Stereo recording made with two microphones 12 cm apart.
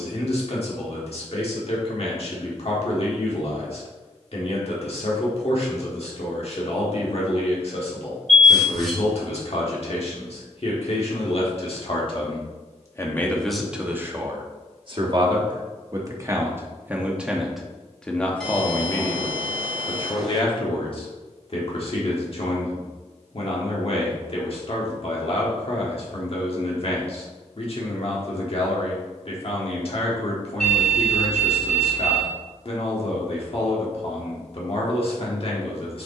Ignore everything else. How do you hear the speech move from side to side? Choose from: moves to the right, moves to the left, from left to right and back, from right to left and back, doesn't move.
from left to right and back.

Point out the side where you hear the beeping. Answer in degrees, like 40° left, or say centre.
centre.